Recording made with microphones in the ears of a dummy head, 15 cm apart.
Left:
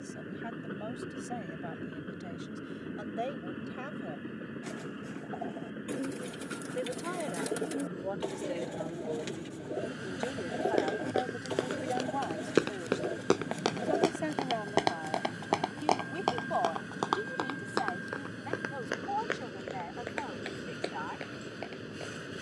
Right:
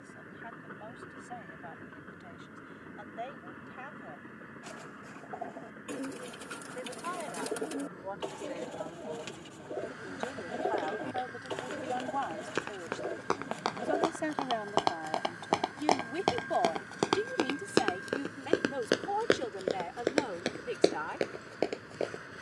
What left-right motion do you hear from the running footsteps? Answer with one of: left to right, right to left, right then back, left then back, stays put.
left to right.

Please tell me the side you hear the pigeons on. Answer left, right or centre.
centre.